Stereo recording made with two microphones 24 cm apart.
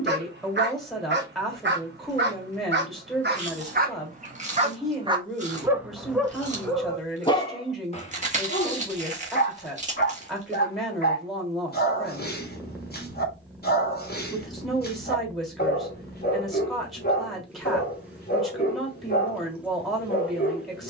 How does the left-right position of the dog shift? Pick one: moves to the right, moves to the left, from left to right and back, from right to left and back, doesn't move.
moves to the left.